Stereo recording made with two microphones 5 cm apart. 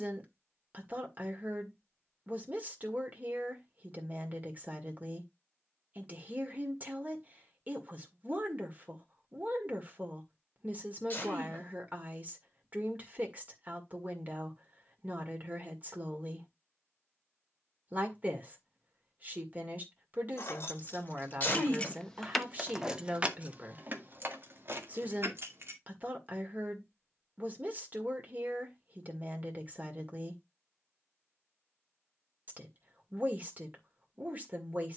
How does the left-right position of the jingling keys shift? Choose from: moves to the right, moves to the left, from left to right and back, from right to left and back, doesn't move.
moves to the right.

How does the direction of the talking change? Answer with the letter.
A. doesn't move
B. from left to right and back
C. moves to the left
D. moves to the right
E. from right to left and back
A.